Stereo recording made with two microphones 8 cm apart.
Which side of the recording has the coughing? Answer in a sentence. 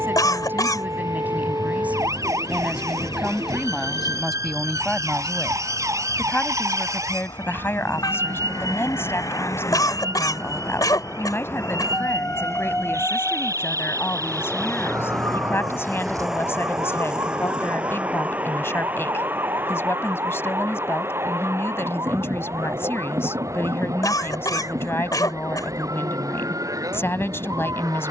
You can hear the coughing on the left.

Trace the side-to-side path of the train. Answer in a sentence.
You can hear the train go from the left side to the right.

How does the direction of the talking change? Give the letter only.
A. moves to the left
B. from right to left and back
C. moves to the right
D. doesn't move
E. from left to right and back
A.